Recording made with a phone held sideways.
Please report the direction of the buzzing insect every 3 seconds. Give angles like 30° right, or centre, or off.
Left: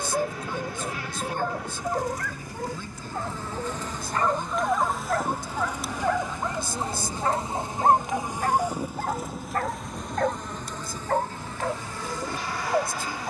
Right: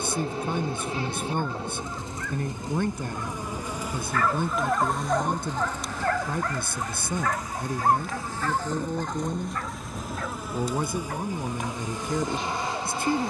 30° right, centre, 20° left, 10° right, 20° right.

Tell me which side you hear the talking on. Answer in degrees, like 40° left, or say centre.
60° right.